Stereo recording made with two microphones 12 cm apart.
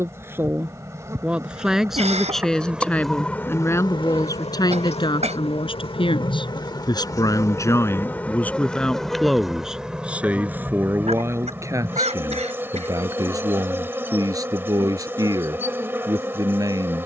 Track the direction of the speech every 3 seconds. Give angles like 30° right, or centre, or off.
10° right, 30° left, 20° left, 10° right, 30° right, 30° right.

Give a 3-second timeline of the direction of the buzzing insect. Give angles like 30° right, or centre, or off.
20° right, 40° left, 20° left, 10° right, 20° right, 20° right.